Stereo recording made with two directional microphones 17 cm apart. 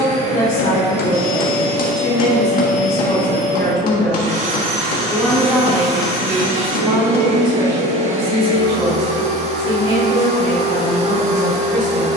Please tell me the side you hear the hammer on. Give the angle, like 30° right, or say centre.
60° left.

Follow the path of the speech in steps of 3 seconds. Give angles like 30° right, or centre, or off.
50° left, 10° left, 30° right, 50° right.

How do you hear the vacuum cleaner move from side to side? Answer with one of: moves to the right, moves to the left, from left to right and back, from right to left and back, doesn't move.
doesn't move.